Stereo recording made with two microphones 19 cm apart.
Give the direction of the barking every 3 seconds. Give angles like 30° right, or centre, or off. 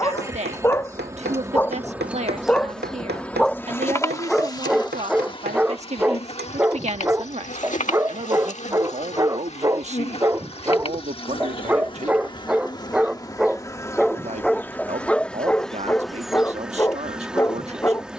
10° left, centre, 10° right, 10° right, centre, 10° left.